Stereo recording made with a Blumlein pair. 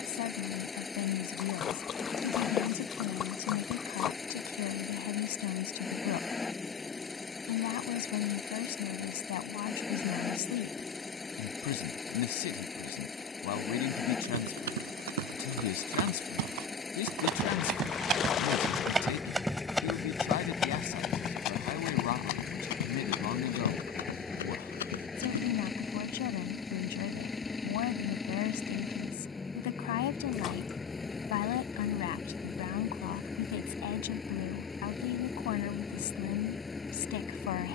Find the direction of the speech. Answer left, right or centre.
left.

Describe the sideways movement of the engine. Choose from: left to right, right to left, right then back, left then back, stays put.
stays put.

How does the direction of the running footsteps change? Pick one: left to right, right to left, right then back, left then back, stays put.
right to left.